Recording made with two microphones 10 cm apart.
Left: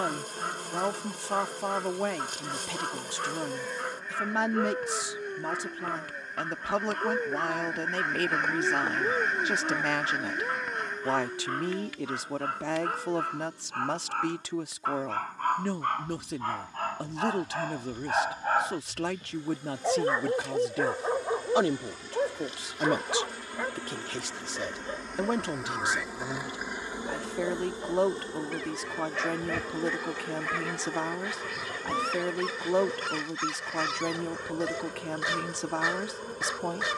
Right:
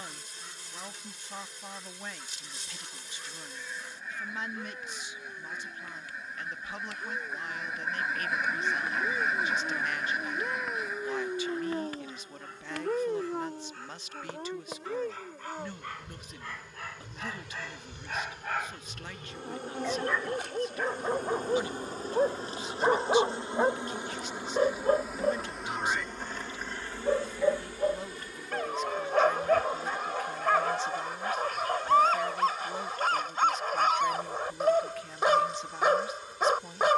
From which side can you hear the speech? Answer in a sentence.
In this clip you hear the speech on the left.